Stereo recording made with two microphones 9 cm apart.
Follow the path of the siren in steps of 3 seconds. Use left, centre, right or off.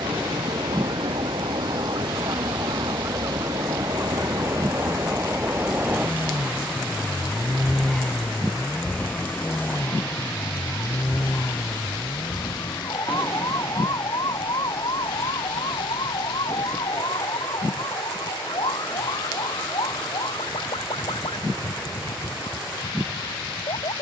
right, right, centre, left, left, left, left, left.